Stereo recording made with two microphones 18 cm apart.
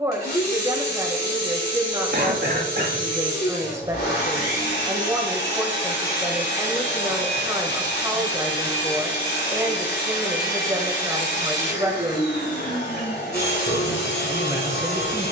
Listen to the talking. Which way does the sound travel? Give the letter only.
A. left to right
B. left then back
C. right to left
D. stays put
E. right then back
D.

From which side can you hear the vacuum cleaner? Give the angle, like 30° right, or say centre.
60° left.